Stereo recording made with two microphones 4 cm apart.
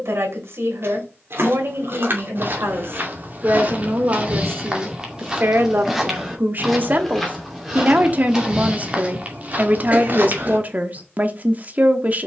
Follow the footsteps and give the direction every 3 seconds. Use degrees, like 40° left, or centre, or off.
50° right, 20° right, 10° right, 40° right.